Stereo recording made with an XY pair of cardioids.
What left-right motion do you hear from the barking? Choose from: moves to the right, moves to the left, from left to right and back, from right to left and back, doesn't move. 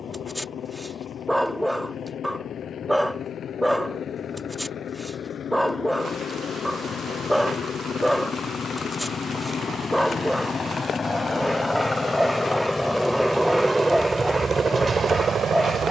doesn't move.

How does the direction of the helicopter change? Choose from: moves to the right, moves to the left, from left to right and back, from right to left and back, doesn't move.
moves to the right.